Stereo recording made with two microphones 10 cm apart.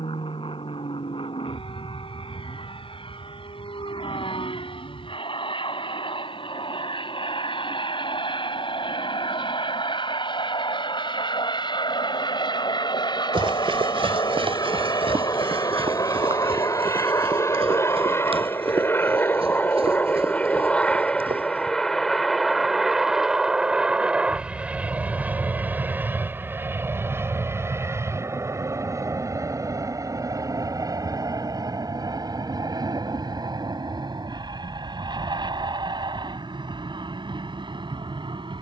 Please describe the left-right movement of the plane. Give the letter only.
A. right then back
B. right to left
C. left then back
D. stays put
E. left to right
E.